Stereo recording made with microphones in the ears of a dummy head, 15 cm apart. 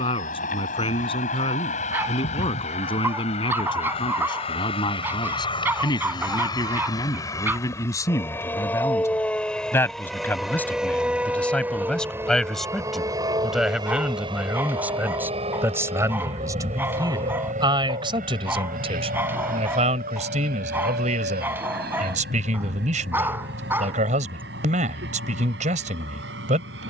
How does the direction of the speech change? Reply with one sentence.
In this clip you hear the speech move from left to right.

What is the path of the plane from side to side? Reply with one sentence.
You can hear the plane move from left to right.